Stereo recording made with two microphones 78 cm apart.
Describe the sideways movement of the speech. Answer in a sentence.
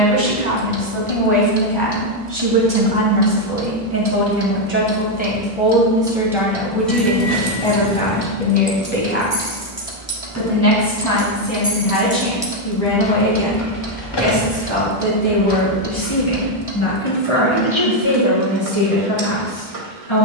In this clip you hear the speech move to the left.